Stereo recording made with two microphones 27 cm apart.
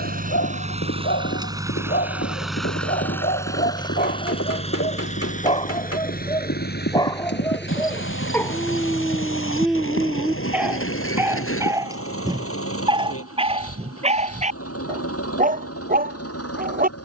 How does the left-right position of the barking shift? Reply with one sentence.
In this clip you hear the barking move from left to right.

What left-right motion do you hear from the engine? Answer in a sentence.
You can hear the engine travel towards the left.